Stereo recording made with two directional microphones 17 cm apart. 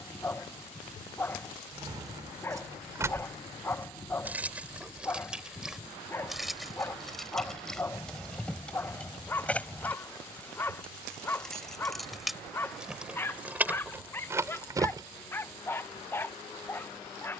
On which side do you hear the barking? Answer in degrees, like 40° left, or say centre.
10° left.